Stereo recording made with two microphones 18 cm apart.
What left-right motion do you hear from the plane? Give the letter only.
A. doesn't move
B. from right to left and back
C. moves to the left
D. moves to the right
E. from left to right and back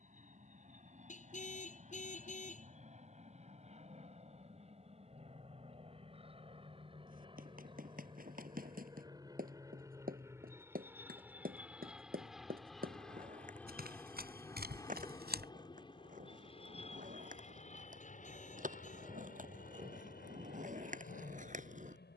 C.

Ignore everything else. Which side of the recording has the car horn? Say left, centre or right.
left.